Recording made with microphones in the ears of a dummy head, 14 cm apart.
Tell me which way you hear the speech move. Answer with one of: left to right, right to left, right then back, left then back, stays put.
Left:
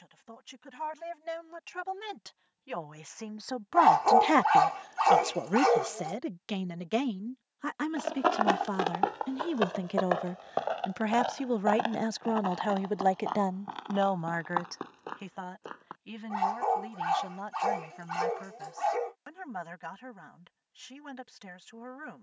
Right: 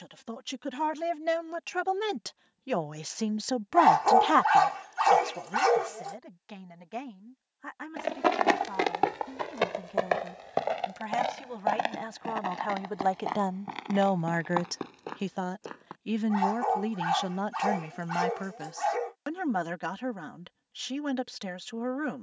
left then back.